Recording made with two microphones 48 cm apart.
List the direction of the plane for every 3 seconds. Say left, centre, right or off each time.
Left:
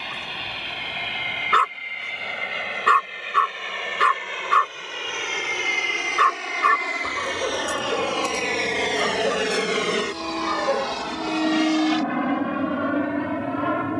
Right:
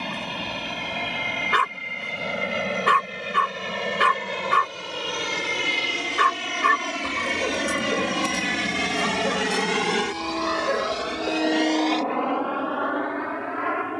right, right, right, centre, left.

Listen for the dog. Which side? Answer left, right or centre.
centre.